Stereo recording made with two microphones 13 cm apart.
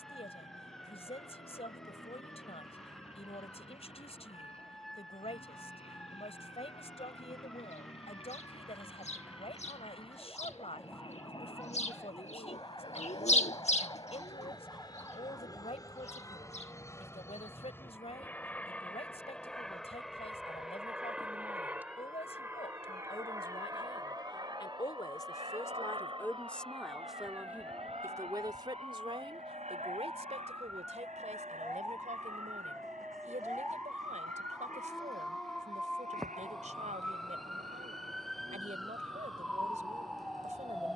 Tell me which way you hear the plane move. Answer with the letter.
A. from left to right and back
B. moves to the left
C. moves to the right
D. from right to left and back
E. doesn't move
C.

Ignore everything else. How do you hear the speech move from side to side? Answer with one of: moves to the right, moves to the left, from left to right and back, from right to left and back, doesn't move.
moves to the right.